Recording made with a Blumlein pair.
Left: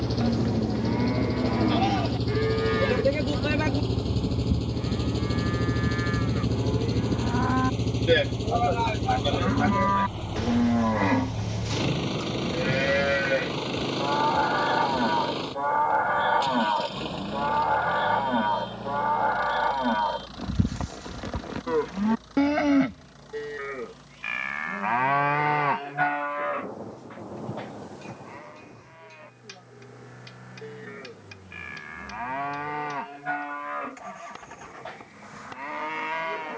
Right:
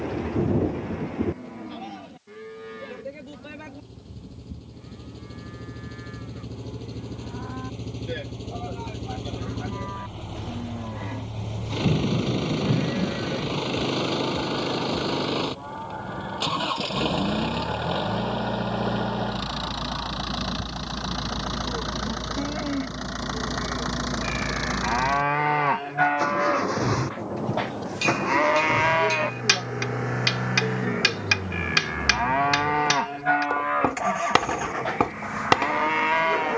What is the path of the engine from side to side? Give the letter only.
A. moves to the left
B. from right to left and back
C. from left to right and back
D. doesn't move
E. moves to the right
E.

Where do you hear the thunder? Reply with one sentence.
In this clip you hear the thunder on the right.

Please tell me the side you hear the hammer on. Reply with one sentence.
You can hear the hammer on the right.